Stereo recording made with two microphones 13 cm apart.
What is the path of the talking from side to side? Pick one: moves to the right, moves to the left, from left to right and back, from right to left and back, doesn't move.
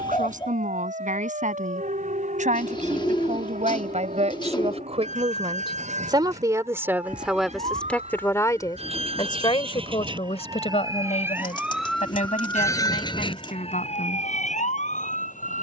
moves to the left.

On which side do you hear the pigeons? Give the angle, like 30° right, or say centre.
40° left.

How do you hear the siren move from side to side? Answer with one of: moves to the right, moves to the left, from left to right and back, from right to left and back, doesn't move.
moves to the left.